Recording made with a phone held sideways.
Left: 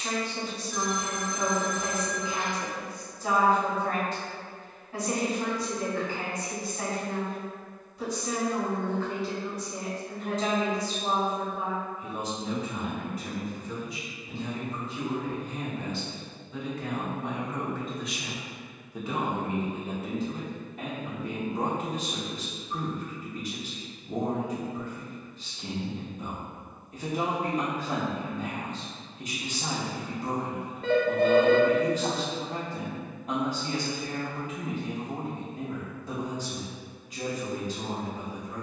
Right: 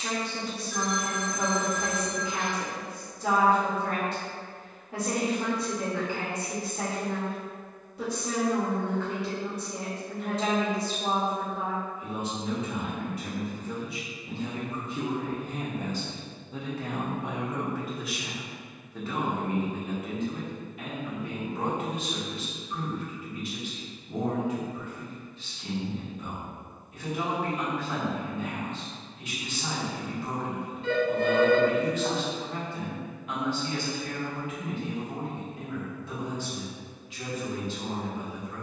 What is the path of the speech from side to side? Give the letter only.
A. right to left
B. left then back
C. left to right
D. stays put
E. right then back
A.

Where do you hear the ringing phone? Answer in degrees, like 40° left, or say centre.
60° left.